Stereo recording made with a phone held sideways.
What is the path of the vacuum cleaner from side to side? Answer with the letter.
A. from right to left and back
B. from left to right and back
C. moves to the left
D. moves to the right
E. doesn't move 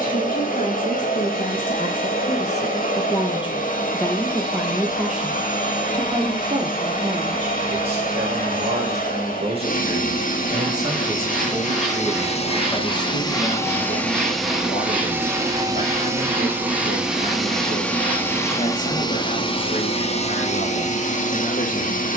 B.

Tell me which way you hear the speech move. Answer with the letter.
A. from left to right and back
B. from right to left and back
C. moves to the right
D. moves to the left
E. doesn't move
A.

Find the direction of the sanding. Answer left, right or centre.
centre.